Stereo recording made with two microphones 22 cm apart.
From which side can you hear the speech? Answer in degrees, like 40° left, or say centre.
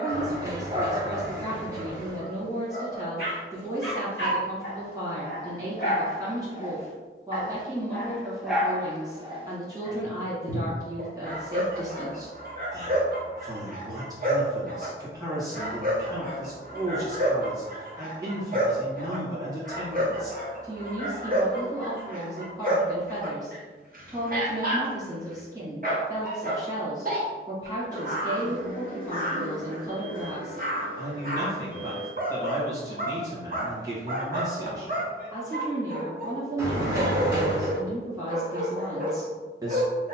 20° right.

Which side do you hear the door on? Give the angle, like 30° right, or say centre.
10° right.